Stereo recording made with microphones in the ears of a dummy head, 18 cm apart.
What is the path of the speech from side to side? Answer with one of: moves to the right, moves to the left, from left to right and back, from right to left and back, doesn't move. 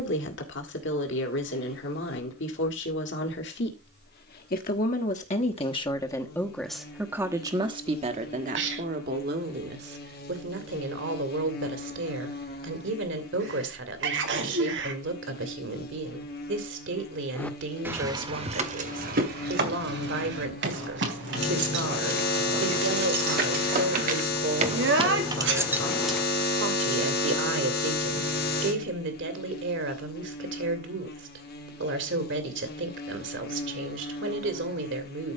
moves to the right.